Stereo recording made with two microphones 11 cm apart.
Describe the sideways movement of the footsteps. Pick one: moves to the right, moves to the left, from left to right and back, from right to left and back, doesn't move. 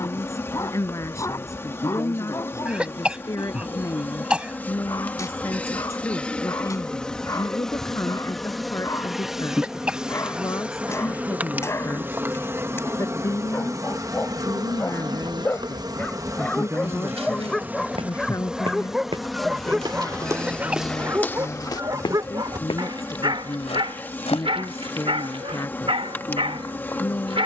moves to the left.